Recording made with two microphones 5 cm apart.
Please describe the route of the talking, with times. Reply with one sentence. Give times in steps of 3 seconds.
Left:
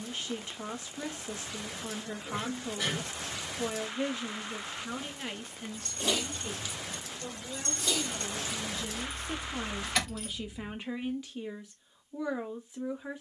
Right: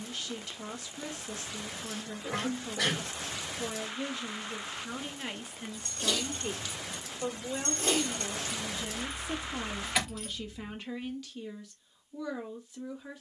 You can hear the talking on the left from 0 s, in the centre from 3 s, on the right from 6 s, in the centre from 9 s and on the left from 12 s.